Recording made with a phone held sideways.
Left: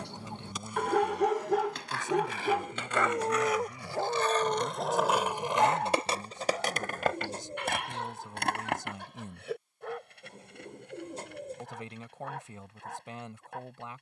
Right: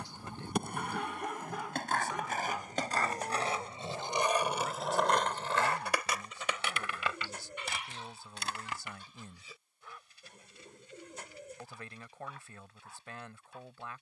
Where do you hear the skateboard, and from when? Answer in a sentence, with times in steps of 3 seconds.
In this clip you hear the skateboard on the right from 0 s, in the centre from 3 s, on the left from 6 s and not at all from 9 s.